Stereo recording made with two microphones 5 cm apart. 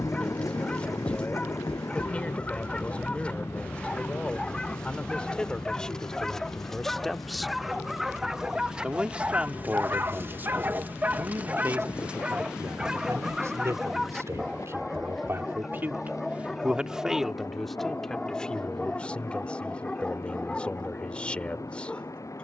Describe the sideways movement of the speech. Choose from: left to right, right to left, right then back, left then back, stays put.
right then back.